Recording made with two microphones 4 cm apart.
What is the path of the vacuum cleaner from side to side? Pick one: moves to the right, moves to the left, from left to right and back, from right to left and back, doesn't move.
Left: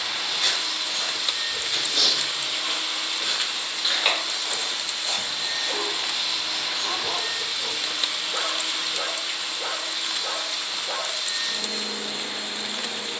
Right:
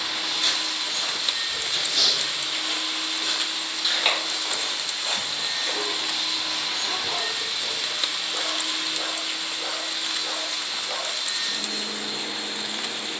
doesn't move.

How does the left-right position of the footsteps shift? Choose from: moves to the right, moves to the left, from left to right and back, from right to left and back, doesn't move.
moves to the right.